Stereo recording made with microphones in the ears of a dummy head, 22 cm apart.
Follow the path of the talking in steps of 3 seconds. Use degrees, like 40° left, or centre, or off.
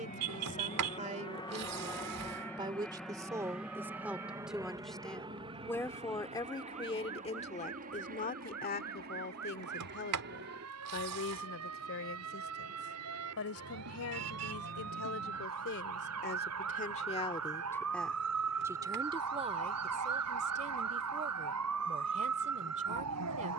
30° right, centre, 30° left, 50° left, 60° left, 40° left, 20° right, 30° right.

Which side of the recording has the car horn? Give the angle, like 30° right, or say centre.
70° right.